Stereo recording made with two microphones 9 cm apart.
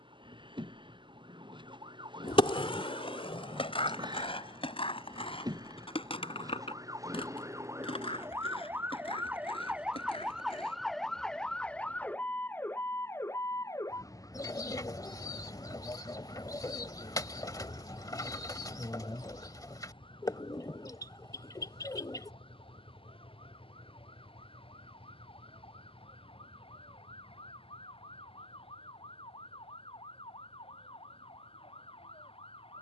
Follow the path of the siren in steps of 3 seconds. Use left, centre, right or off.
right, right, right, centre, left, left, left, left, left, left, left.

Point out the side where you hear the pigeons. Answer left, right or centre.
left.